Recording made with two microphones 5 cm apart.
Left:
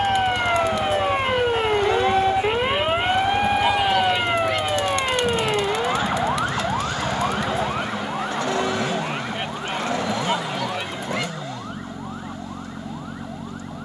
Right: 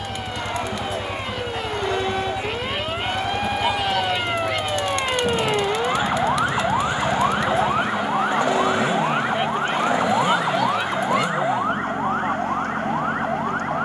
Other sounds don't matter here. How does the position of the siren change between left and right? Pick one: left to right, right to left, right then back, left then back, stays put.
left to right.